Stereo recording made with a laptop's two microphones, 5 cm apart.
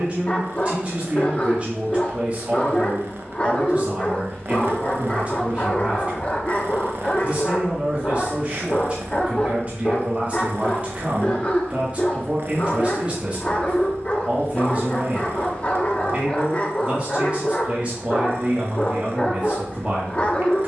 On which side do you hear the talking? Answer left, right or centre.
right.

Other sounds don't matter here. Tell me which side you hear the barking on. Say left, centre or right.
left.